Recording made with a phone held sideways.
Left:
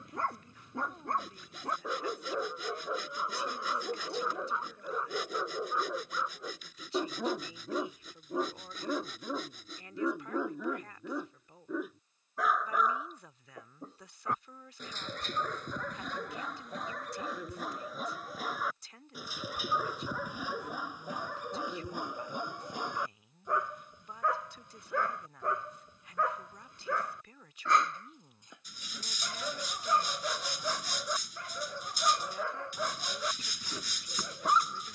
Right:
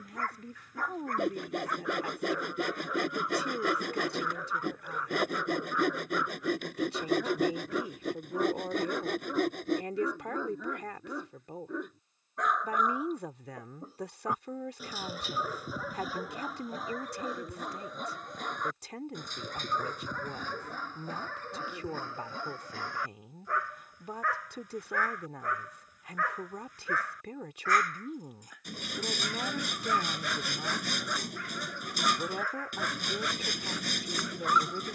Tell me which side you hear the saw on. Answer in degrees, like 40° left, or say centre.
60° right.